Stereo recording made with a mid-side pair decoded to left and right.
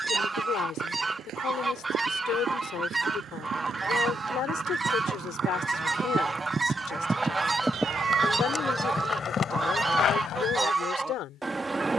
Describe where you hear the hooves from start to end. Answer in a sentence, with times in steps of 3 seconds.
In this clip you hear the hooves on the right from 0 s, in the centre from 6 s and on the left from 9 s.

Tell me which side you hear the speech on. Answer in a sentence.
You can hear the speech on the left.